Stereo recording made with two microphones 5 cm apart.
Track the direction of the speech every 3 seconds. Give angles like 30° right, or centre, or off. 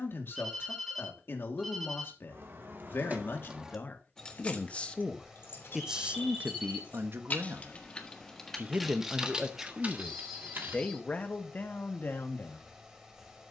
50° left, 30° left, 40° right, 20° left, 50° left.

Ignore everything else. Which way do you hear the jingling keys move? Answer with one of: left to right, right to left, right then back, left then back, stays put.
left then back.